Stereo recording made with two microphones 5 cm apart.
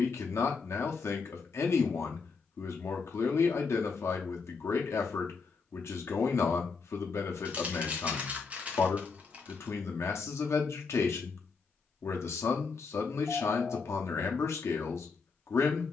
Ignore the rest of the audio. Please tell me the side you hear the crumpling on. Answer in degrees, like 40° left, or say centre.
30° right.